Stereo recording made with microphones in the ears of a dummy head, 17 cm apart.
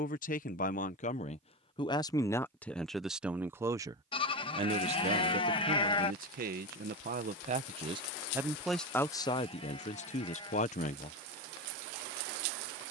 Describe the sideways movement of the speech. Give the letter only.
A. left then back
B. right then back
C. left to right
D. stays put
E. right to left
B.